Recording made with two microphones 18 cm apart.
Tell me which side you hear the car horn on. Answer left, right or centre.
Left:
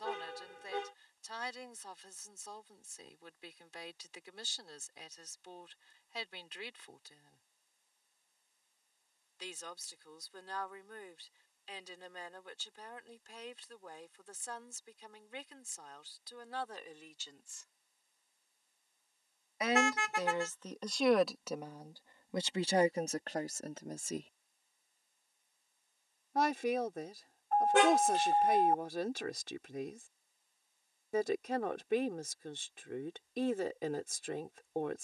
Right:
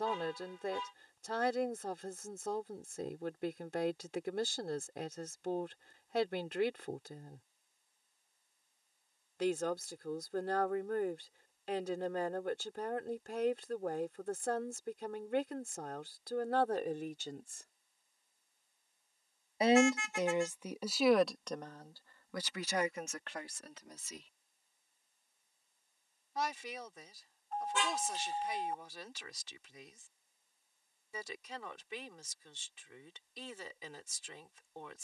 left.